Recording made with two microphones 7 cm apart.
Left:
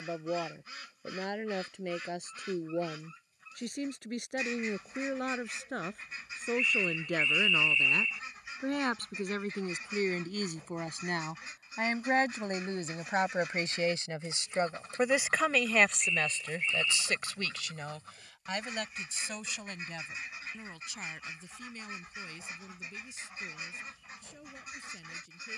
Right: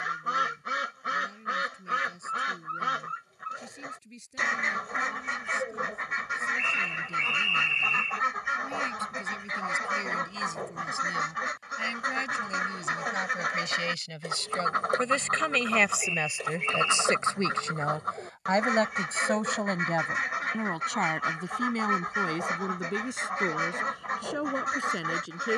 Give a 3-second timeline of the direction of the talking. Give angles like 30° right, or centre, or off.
70° left, 70° left, 60° left, 60° left, 30° left, 10° right, 50° right, 70° right, 70° right.